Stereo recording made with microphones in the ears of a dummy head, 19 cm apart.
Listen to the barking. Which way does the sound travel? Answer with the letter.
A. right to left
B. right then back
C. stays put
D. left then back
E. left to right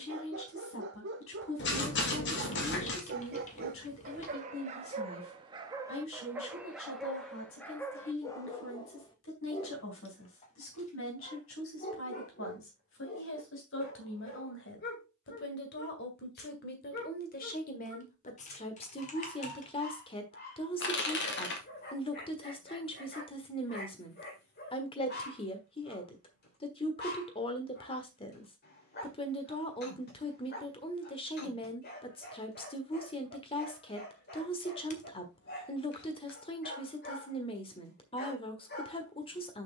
A.